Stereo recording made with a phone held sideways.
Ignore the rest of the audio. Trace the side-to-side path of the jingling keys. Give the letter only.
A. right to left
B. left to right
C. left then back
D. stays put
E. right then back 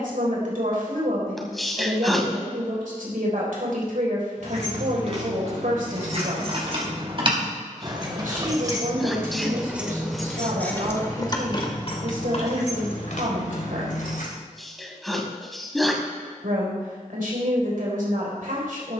A.